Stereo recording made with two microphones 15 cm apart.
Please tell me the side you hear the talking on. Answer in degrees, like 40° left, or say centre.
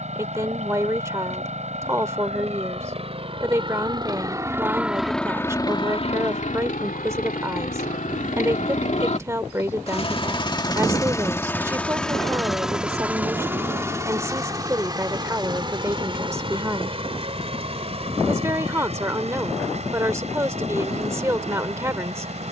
20° right.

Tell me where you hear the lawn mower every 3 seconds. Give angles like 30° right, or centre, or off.
50° right, 10° right, 60° left, 30° left, 10° right, 40° right, 50° right, 50° right.